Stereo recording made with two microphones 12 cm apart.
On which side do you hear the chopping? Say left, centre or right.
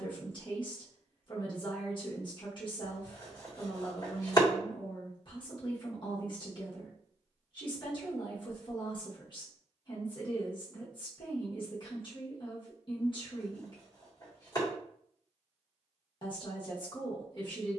left.